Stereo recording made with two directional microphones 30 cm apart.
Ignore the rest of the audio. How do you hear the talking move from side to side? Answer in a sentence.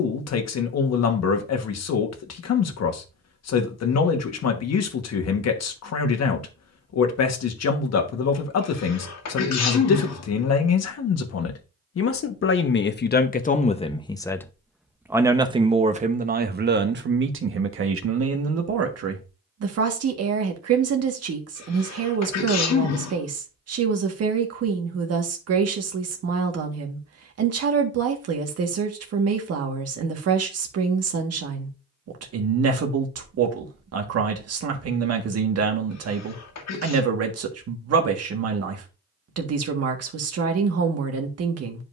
In this clip you hear the talking move from left to right.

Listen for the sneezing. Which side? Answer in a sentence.
You can hear the sneezing on the left.